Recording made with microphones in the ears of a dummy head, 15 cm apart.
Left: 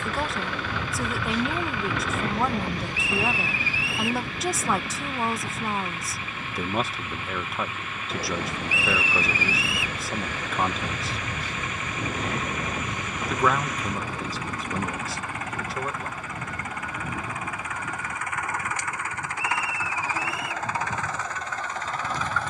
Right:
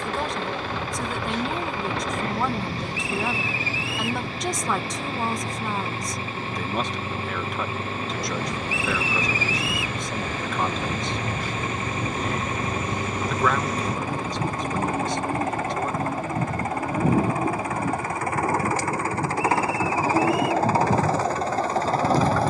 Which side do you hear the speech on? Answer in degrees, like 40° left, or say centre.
centre.